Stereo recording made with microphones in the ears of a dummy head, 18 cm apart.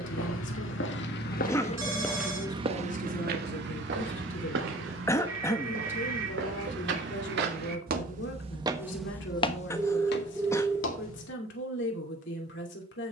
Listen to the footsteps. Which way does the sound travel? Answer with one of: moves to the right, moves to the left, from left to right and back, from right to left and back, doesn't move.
from left to right and back.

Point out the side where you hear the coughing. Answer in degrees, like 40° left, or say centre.
10° left.